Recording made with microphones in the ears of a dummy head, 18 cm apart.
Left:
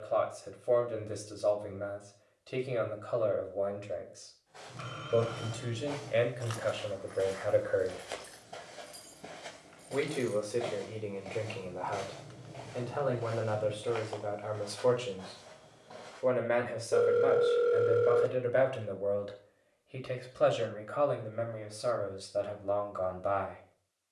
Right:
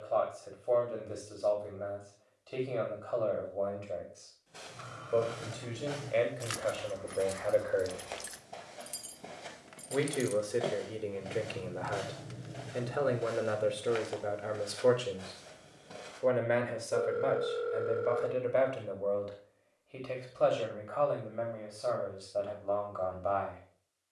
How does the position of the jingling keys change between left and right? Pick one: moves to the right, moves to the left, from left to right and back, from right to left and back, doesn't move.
from left to right and back.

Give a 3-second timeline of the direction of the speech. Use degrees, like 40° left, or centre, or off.
20° left, 20° left, 10° left, 10° right, 20° right, centre, 10° left, 20° left.